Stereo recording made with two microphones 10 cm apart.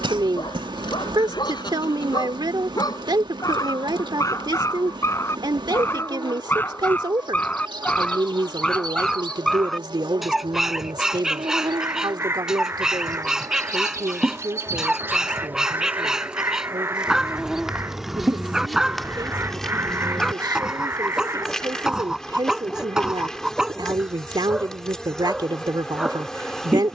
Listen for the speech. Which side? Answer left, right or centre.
right.